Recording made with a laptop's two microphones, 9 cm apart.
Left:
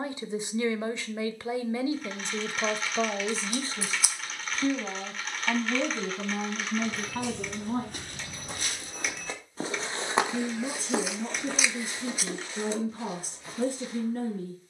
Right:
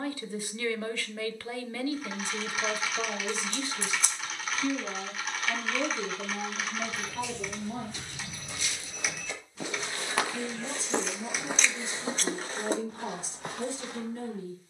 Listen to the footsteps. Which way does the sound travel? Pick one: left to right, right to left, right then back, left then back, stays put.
left to right.